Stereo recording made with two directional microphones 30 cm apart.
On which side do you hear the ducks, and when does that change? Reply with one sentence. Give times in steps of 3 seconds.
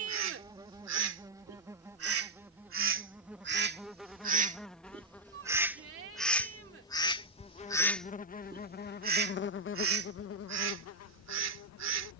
You can hear the ducks on the right from 0 s, in the centre from 6 s and on the right from 9 s.